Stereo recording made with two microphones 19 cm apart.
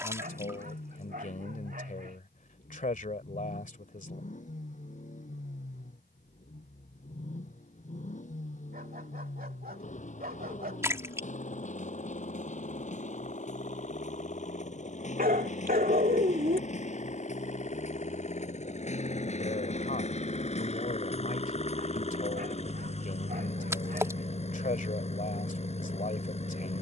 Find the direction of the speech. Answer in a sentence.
In this clip you hear the speech on the left.